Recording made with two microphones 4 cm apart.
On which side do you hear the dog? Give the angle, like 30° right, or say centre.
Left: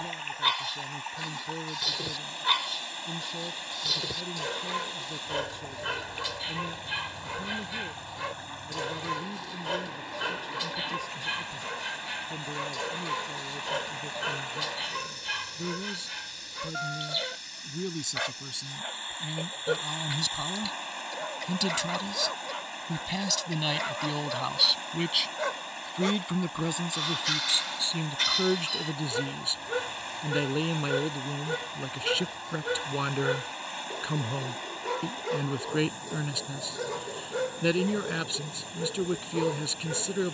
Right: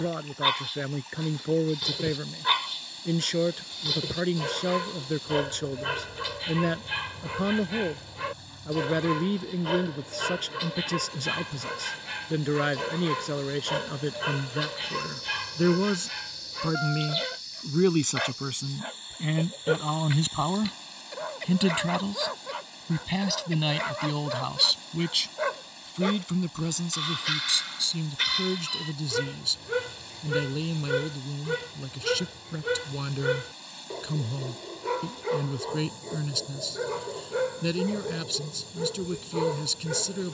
10° right.